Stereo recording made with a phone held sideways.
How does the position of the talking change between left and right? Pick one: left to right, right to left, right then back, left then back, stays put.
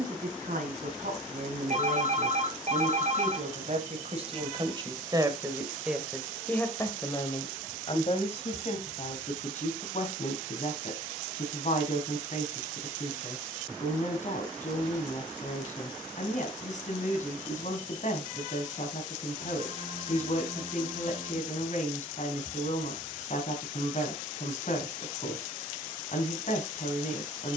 right to left.